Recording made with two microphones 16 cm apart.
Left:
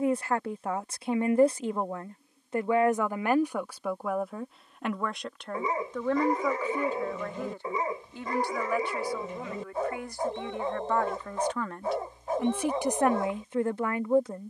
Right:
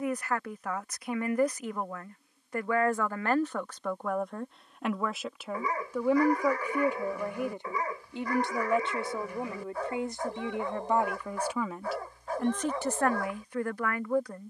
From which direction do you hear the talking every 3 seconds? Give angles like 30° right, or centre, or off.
30° left, centre, 20° right, 20° right, 20° left.